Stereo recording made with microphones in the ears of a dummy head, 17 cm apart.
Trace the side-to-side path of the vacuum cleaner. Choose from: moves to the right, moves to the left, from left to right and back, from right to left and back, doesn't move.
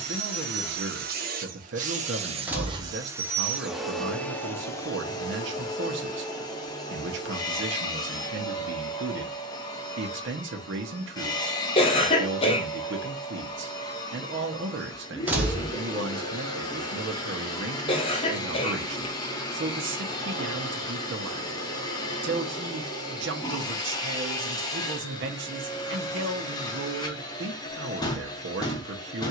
moves to the left.